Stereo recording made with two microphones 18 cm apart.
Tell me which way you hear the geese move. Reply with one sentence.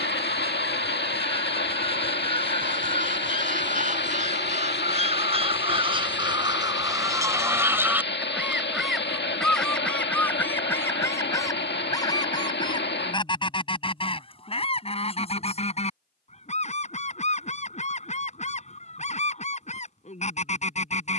In this clip you hear the geese go from the right side to the left.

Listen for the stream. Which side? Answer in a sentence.
You can hear the stream on the left.